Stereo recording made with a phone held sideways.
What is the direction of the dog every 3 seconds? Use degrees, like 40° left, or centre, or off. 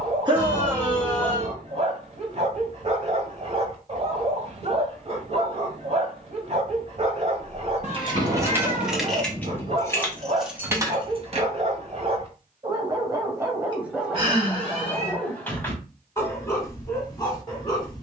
40° right, 40° right, 40° right, 40° right, 10° right, 20° left.